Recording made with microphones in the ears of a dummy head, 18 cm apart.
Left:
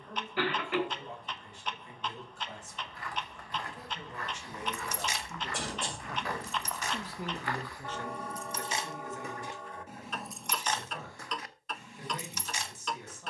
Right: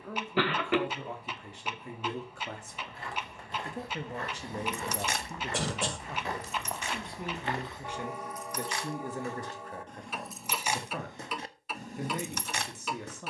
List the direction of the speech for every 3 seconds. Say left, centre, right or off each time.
right, right, centre, right, right.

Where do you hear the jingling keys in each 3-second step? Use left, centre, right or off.
off, right, left, centre, right.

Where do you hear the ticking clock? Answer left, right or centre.
centre.